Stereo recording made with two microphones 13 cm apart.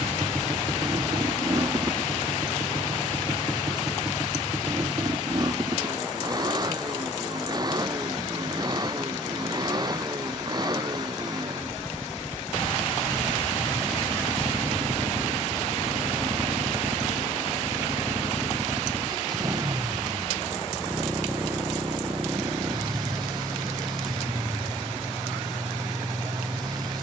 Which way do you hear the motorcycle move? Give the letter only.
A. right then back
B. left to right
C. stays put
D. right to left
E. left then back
C.